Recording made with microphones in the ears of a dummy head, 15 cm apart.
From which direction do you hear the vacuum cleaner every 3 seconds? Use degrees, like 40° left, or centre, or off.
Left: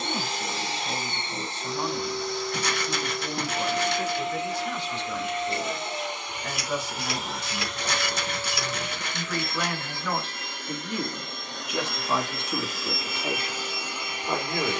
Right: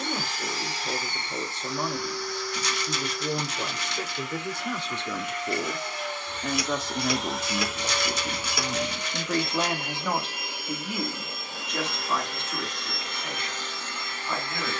20° left, 20° left, centre, 10° right, 10° left.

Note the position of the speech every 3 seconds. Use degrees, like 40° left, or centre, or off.
80° right, 80° right, 50° right, 10° right, 20° left.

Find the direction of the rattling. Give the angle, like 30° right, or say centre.
40° left.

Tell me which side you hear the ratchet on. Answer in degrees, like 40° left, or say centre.
70° right.